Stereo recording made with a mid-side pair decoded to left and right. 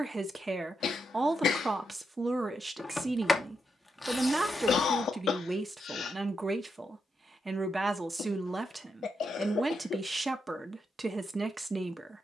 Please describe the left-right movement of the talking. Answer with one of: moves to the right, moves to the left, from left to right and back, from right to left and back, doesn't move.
doesn't move.